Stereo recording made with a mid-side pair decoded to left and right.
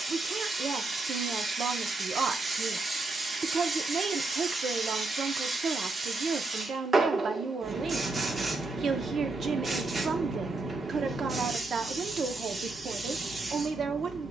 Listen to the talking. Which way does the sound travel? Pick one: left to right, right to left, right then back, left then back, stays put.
stays put.